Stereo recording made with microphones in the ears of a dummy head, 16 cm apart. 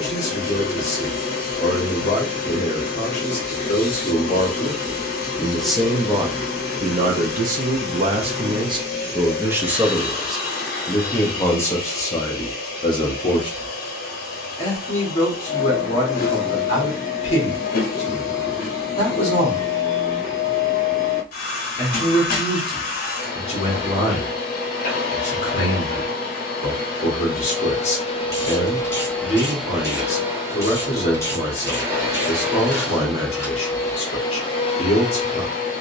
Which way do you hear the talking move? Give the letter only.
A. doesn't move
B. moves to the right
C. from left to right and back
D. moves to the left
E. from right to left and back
C.